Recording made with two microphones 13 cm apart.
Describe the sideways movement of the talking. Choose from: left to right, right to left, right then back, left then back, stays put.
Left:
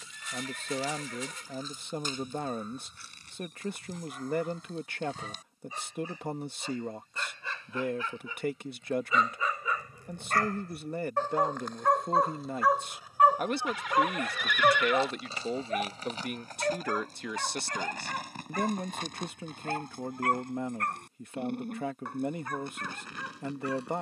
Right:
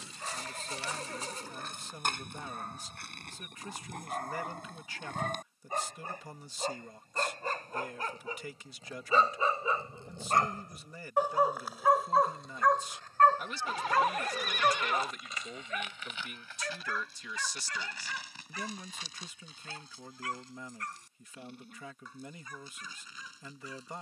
stays put.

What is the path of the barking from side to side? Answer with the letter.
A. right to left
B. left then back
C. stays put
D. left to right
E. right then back
A.